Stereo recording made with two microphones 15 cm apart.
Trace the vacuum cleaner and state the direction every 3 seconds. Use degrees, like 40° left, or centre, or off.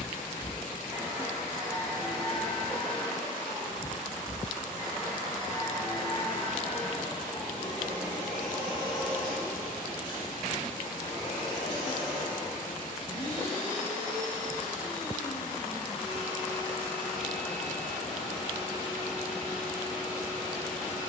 10° right, 20° left, 30° left, 30° left, 30° left, 30° left, 30° left.